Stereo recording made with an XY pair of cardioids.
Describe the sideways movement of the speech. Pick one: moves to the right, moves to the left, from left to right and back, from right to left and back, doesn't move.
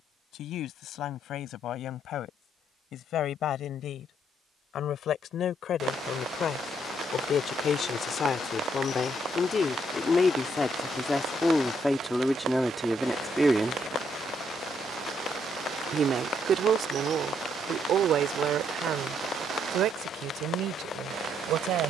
moves to the right.